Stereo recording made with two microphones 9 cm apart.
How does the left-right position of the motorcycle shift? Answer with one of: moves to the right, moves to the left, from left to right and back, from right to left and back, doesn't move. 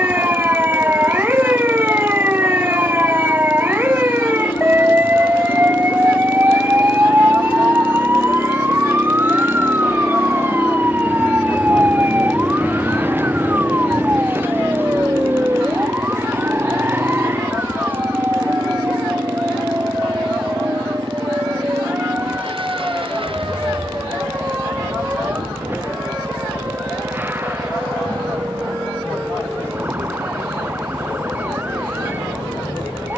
moves to the right.